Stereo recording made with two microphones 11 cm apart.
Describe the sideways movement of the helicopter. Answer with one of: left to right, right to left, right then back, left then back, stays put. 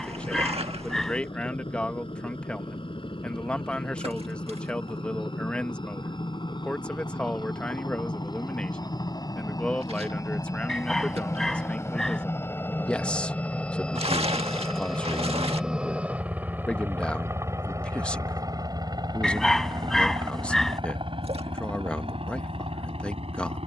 left to right.